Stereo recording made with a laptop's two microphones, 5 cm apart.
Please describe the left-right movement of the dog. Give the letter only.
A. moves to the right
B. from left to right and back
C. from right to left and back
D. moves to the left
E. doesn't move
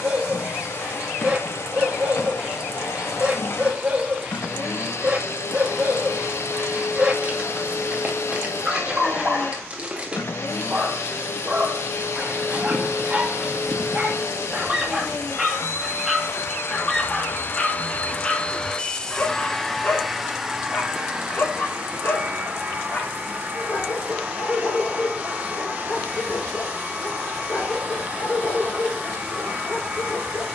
D.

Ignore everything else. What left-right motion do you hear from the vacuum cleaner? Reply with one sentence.
You can hear the vacuum cleaner move from left to right.